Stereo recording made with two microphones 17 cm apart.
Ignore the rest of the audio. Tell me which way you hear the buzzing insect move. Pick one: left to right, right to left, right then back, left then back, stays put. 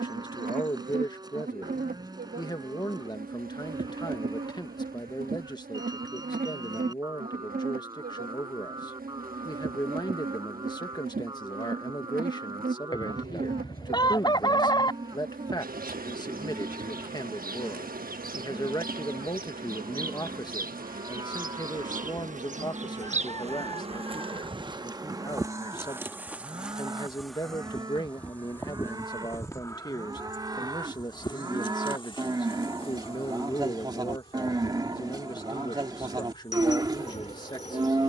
right to left.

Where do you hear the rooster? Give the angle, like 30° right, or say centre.
20° left.